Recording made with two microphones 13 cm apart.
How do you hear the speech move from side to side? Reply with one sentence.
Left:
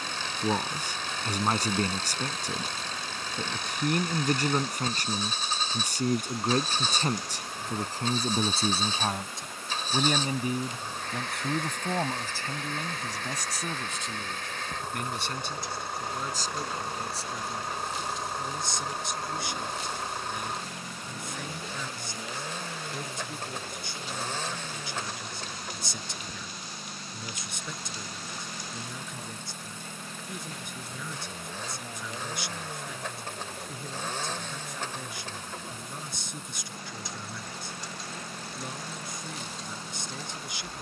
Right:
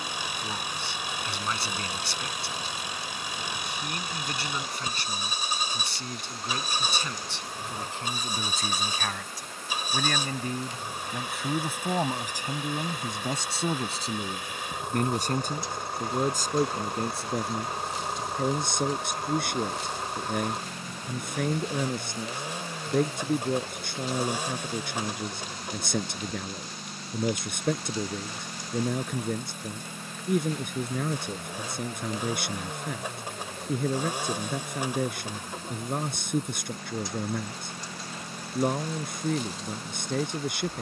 You can hear the speech move to the right.